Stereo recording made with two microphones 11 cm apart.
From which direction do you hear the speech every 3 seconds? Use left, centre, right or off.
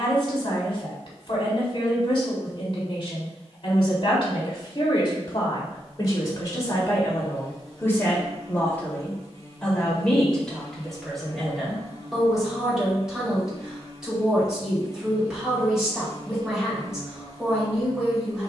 left, left, left, centre, centre, centre.